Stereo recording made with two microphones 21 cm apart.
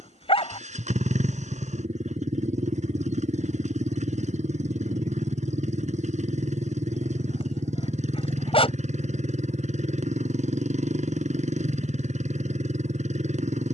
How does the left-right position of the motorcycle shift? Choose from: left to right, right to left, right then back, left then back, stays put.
stays put.